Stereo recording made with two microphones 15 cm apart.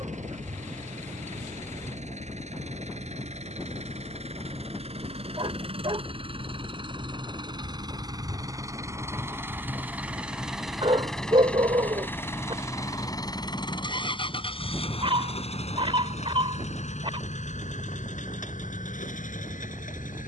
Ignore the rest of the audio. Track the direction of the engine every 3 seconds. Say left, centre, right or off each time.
right, right, right, centre, left, left, left.